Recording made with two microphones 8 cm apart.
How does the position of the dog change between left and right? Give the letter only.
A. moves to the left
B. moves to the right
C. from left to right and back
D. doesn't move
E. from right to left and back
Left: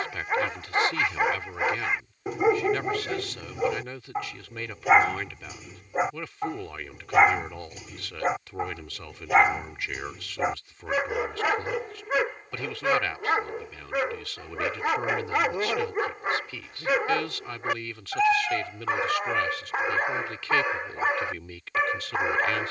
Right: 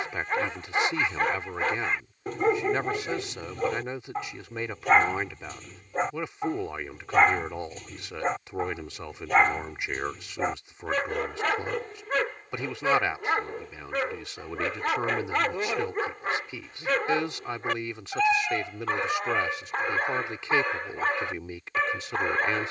D.